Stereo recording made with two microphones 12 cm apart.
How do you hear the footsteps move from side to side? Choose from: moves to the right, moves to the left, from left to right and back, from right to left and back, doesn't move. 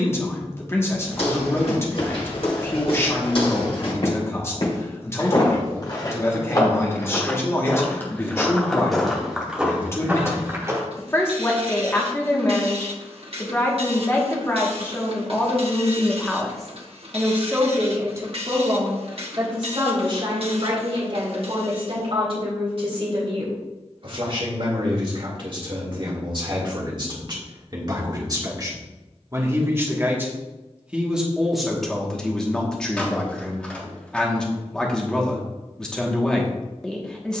moves to the right.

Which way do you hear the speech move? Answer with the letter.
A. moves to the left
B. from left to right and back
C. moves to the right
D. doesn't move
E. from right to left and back
B.